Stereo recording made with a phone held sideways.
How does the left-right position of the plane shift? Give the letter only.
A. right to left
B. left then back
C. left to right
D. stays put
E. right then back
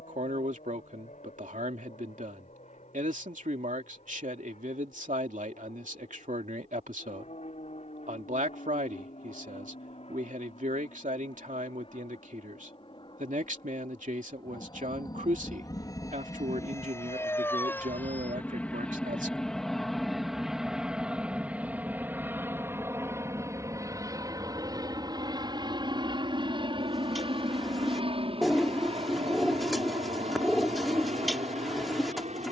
C.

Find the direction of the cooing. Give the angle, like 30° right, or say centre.
centre.